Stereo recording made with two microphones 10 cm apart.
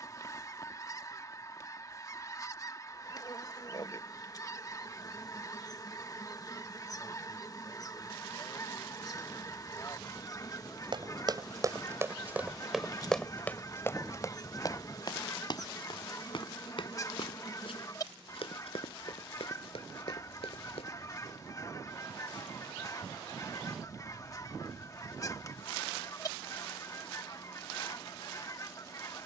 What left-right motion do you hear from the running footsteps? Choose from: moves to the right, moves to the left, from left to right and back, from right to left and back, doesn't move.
moves to the left.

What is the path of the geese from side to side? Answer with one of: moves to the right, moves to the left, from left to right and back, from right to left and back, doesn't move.
doesn't move.